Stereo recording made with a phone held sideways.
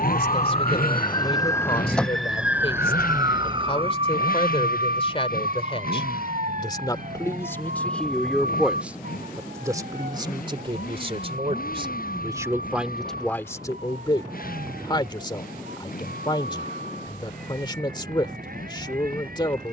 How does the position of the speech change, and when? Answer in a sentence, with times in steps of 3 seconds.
In this clip you hear the speech on the left from 0 s, in the centre from 6 s, on the right from 9 s, in the centre from 12 s and on the left from 15 s.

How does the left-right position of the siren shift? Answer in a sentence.
You can hear the siren travel towards the right.